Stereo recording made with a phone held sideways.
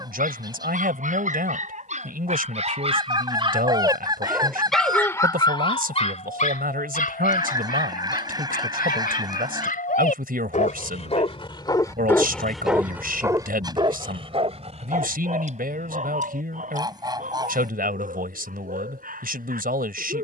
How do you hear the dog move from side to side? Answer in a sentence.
In this clip you hear the dog move from right to left and back again.